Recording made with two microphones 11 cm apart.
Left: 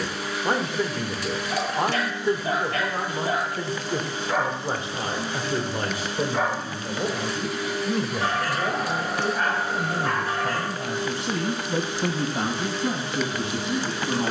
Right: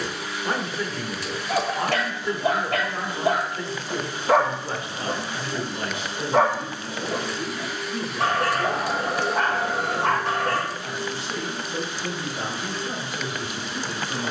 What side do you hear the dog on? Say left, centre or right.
right.